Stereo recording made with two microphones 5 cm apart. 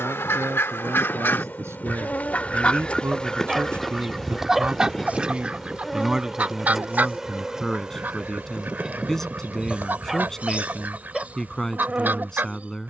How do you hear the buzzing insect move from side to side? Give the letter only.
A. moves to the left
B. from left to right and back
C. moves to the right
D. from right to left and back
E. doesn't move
C.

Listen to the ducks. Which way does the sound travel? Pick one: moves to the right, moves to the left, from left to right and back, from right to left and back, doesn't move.
moves to the right.